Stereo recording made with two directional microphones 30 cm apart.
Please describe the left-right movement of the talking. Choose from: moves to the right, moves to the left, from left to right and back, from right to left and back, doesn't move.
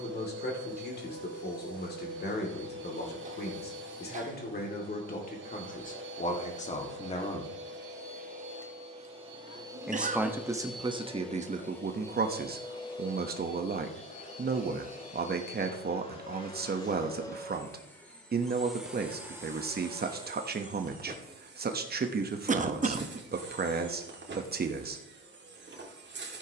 moves to the right.